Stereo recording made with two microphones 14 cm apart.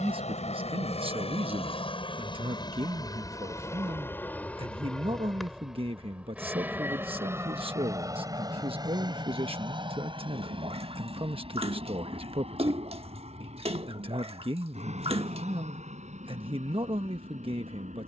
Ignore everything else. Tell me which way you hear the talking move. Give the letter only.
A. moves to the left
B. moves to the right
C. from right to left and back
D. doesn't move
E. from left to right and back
D.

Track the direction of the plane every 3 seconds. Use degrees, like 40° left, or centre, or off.
40° left, 10° left, 20° right, 30° right, 40° right, 50° right.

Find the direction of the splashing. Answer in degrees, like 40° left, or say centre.
50° right.